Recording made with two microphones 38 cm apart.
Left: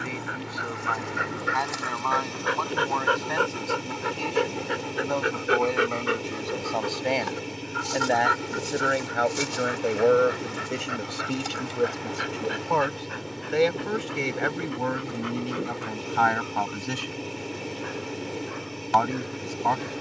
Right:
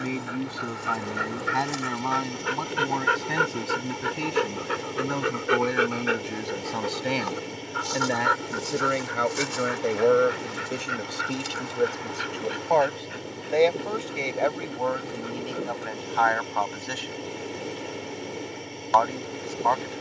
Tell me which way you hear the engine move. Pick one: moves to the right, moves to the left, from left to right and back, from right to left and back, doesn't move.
doesn't move.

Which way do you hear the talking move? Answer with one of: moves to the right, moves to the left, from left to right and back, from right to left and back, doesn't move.
moves to the left.